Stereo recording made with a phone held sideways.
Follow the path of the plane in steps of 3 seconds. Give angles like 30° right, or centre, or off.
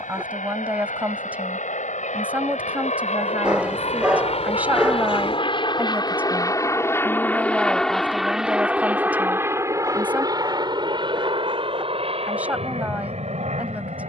70° left, 50° left, 10° left, 30° right, 40° right.